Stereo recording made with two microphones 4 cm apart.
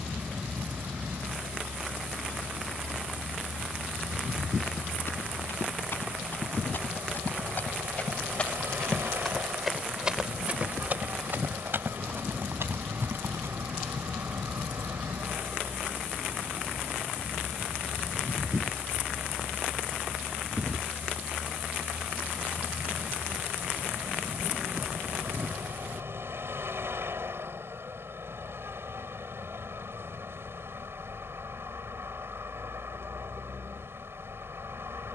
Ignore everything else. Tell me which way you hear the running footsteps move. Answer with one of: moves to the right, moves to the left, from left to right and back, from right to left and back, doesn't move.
moves to the right.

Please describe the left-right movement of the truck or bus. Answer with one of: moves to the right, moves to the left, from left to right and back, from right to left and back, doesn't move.
doesn't move.